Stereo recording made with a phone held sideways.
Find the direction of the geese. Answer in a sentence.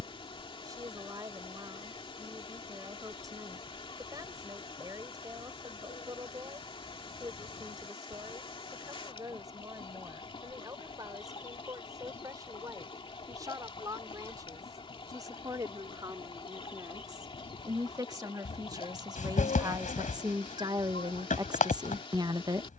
In this clip you hear the geese on the left.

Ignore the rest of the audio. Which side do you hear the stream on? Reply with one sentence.
In this clip you hear the stream on the left.